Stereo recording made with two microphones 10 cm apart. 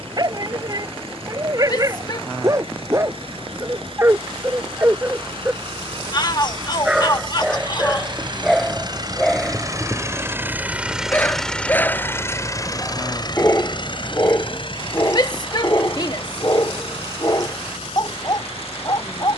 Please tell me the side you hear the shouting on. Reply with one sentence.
You can hear the shouting on the left.